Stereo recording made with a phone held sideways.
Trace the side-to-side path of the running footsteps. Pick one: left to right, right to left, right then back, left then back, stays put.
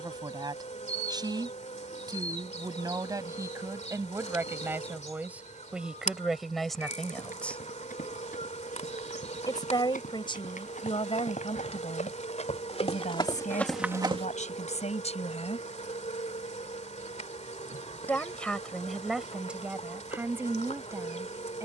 left to right.